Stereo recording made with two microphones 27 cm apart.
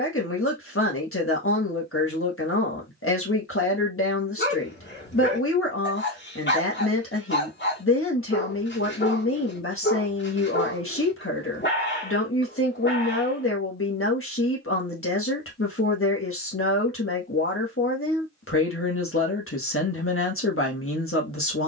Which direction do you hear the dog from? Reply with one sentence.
In this clip you hear the dog on the left.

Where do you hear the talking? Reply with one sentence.
You can hear the talking on the left.